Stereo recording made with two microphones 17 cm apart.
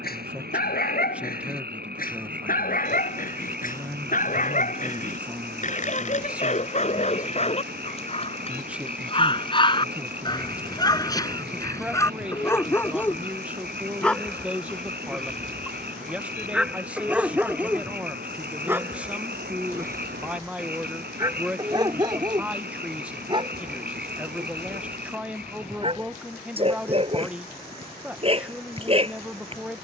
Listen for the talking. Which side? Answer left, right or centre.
centre.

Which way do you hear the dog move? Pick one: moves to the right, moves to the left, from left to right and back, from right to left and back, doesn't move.
moves to the right.